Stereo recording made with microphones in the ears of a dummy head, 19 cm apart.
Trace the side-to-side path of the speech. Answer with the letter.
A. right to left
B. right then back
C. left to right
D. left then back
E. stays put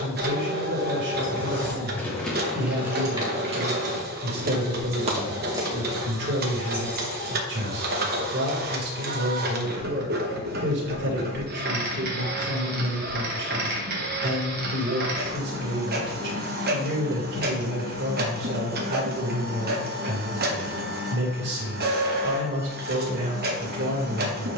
E.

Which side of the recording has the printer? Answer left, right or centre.
right.